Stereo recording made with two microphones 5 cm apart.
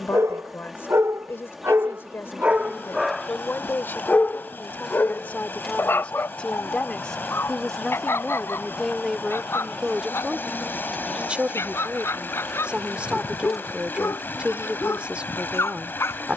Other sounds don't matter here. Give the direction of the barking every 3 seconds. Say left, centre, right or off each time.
right, left, left, left, left, left.